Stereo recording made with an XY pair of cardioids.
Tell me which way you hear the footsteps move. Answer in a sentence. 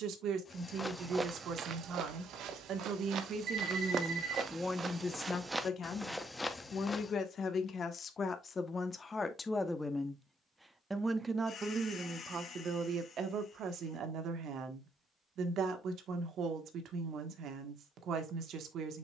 In this clip you hear the footsteps move from left to right and back again.